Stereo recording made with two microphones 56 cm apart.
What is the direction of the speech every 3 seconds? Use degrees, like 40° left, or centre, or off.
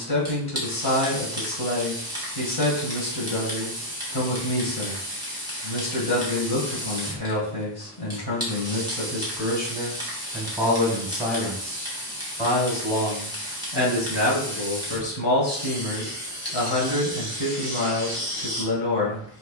40° left, 40° left, 40° left, 10° left, 20° left, 40° left, 40° left.